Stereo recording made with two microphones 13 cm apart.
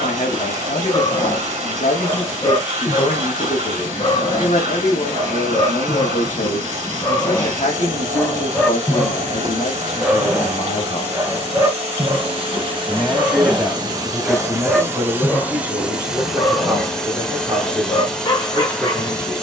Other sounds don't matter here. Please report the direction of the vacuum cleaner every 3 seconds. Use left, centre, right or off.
right, right, right, right, right, centre, centre.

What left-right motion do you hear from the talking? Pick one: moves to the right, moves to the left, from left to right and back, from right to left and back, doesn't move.
moves to the right.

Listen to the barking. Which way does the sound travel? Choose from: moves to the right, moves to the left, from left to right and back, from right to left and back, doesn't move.
from left to right and back.